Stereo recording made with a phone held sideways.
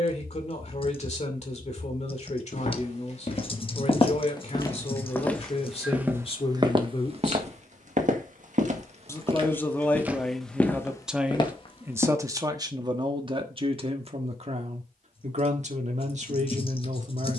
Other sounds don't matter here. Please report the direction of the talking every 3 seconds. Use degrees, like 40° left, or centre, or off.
50° left, 50° left, 40° left, centre, 40° right, 50° right.